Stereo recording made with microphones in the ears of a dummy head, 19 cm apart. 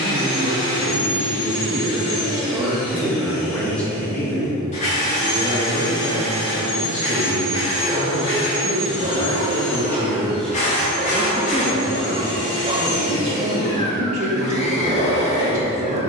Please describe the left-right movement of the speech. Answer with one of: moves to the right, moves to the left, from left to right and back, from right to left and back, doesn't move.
from right to left and back.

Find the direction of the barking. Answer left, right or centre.
right.